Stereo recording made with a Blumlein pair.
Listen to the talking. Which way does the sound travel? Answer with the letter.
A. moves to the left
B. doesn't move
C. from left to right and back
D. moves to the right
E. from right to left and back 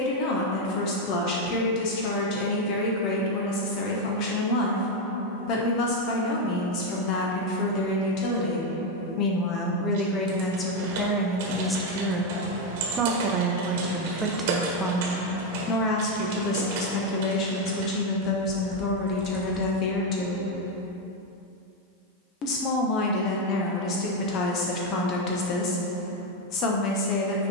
C.